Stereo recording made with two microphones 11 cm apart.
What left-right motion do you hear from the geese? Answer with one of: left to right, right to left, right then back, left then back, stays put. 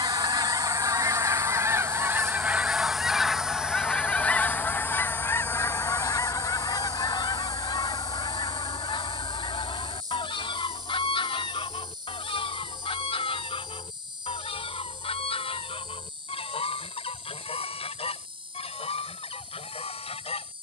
right to left.